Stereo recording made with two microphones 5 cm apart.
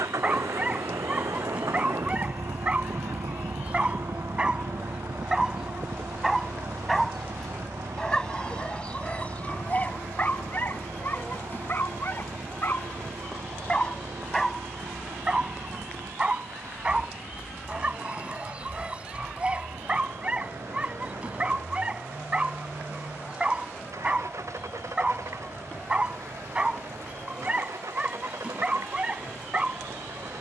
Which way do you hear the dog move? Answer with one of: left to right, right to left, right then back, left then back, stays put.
left then back.